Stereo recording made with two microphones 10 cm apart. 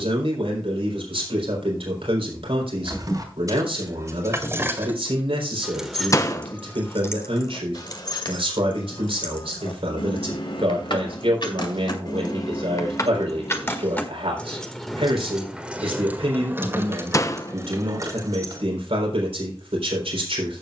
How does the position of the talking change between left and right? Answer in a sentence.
You can hear the talking stay put.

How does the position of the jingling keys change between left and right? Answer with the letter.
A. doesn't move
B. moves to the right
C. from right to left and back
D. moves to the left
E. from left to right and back
C.